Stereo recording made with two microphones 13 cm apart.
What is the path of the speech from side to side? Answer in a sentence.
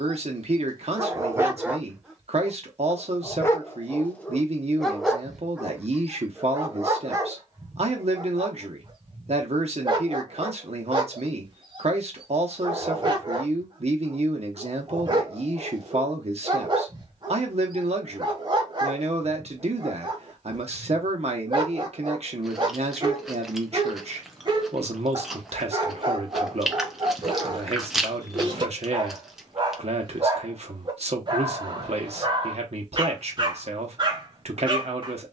In this clip you hear the speech stay in one place.